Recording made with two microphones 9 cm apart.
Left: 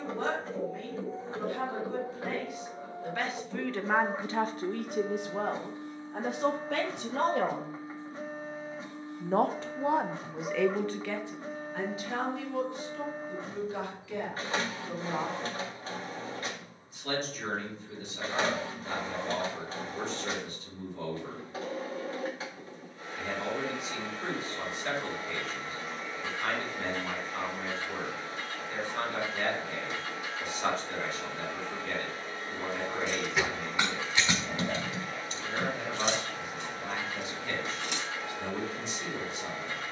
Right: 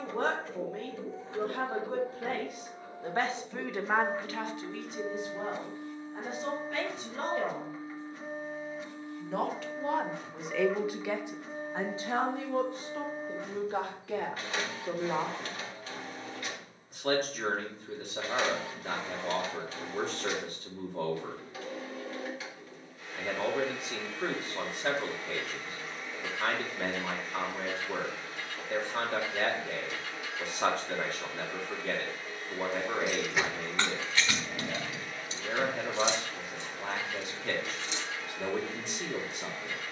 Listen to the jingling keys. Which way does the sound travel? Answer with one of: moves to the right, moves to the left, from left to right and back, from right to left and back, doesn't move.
moves to the left.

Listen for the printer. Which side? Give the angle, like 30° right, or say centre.
30° left.